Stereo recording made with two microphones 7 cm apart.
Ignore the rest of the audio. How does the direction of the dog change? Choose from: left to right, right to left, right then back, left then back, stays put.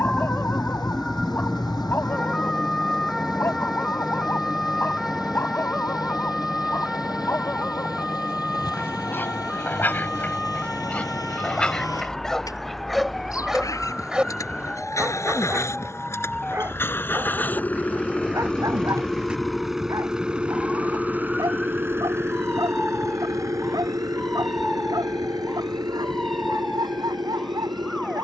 left to right.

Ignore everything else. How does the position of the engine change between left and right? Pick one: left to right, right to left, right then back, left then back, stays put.
left to right.